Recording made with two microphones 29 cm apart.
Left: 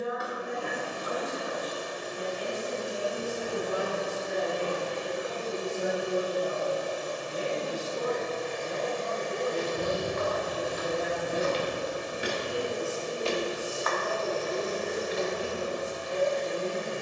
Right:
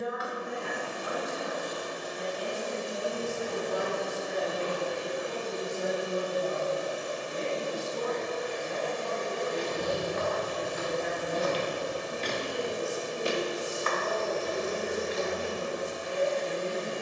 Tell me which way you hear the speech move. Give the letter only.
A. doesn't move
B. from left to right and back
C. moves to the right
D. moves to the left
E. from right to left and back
A.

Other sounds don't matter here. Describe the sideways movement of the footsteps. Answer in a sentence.
You can hear the footsteps go from the left side to the right.